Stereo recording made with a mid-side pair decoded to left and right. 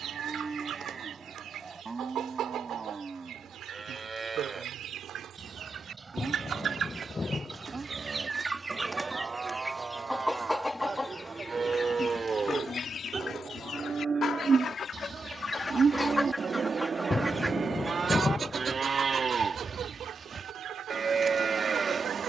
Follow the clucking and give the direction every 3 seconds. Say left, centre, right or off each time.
right, right, right, centre, left, centre, right, right.